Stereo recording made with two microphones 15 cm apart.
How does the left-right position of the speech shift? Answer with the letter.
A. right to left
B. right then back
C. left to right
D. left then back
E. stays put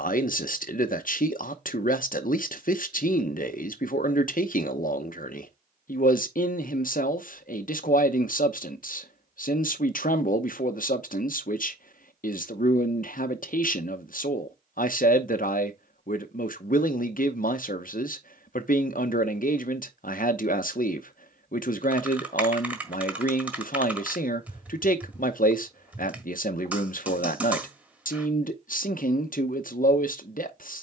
E.